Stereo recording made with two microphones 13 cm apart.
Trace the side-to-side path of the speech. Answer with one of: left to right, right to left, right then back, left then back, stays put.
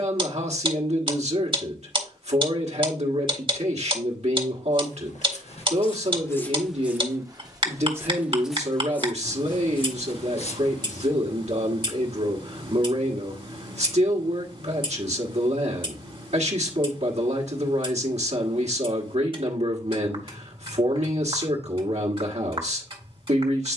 stays put.